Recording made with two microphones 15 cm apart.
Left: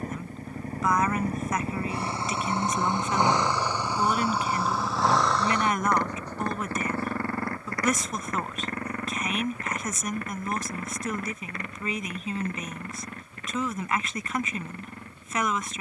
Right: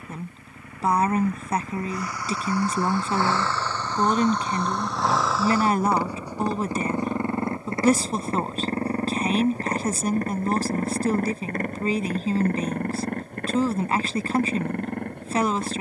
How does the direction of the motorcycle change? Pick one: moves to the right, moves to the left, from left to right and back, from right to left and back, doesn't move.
moves to the right.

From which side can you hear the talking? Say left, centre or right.
right.